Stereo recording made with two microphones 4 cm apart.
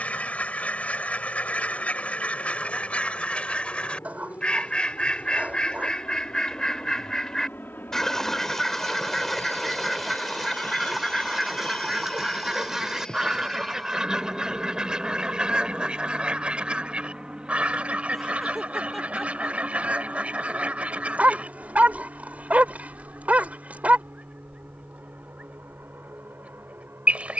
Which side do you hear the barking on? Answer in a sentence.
You can hear the barking on the right.